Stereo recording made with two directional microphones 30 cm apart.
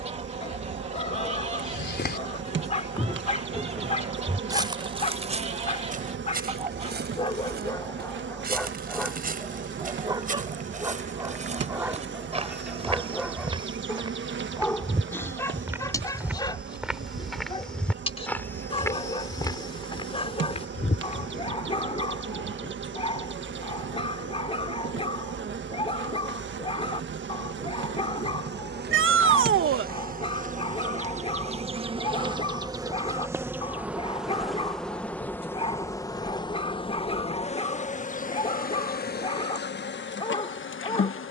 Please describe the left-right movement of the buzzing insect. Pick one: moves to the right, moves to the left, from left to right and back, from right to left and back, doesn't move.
moves to the left.